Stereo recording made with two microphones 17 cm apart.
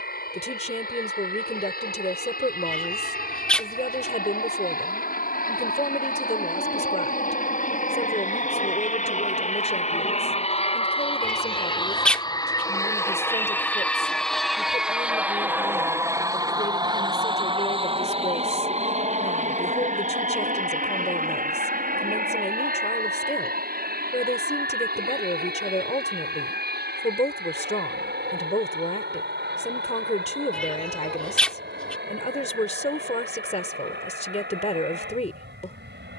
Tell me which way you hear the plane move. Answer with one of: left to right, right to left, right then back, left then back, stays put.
left to right.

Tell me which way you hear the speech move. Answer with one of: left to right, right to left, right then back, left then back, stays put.
stays put.